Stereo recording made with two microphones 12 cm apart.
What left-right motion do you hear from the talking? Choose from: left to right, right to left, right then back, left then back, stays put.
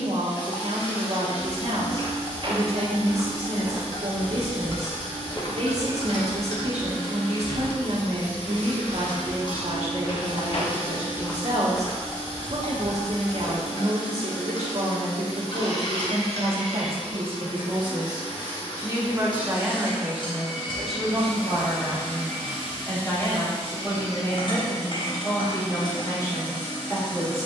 right to left.